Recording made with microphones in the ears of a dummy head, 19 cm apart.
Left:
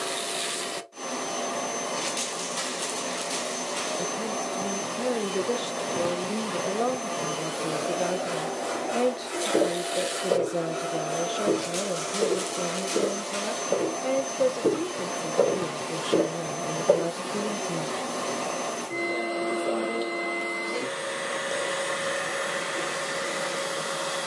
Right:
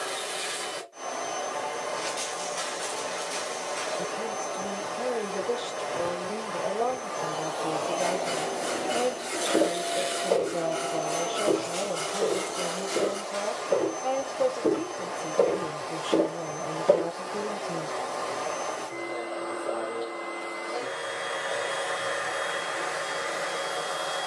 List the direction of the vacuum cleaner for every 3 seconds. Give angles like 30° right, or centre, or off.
50° left, 50° left, 30° left, 10° left, 40° left, 50° left, 50° left, 50° left.